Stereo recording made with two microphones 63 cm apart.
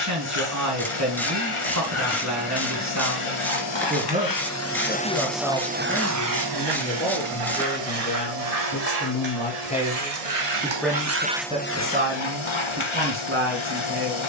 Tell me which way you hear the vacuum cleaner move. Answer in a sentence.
In this clip you hear the vacuum cleaner go right and come back.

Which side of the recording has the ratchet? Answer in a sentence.
In this clip you hear the ratchet in the centre.